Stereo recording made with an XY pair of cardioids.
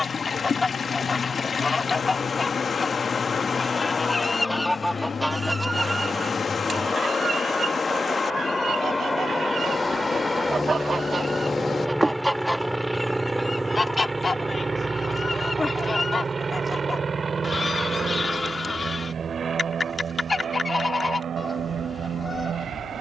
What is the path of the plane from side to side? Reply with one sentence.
You can hear the plane travel towards the right.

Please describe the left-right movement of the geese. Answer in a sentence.
In this clip you hear the geese move from left to right and back again.